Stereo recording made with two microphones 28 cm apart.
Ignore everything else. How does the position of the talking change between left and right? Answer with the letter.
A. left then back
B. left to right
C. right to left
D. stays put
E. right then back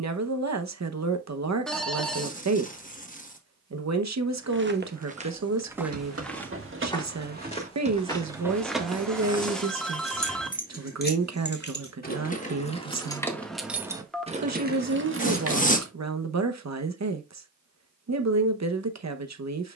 D.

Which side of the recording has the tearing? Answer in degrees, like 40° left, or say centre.
30° left.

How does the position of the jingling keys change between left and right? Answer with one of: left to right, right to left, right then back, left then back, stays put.
left then back.